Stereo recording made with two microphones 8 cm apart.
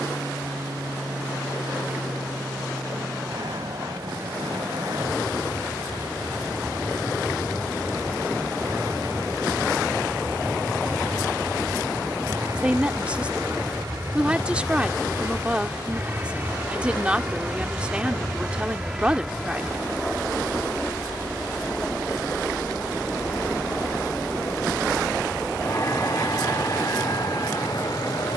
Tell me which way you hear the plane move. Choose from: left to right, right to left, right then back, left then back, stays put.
right to left.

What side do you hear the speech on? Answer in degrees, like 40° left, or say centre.
10° right.